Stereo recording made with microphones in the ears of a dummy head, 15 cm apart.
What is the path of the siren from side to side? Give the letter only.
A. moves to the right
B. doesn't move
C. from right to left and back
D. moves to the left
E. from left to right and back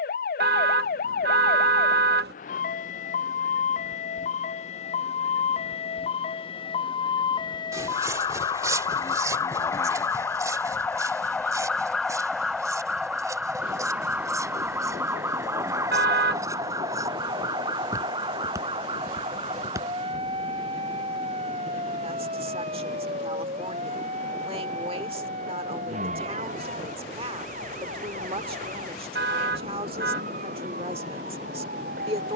A.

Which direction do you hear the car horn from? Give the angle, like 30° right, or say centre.
70° right.